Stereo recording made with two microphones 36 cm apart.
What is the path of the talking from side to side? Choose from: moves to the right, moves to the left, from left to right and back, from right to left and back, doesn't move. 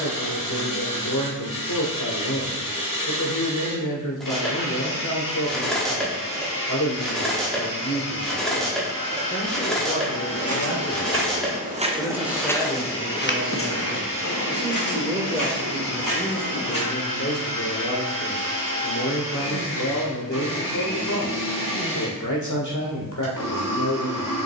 from left to right and back.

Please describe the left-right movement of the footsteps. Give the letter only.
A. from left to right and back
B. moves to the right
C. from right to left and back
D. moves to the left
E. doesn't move
D.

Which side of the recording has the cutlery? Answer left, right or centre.
centre.